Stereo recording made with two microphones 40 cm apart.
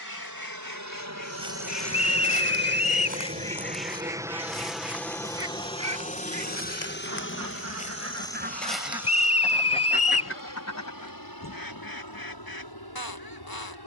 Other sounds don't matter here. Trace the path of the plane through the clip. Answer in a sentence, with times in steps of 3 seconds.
In this clip you hear the plane on the right from 0 s, in the centre from 3 s and on the left from 6 s.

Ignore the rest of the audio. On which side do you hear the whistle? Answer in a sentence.
You can hear the whistle on the left.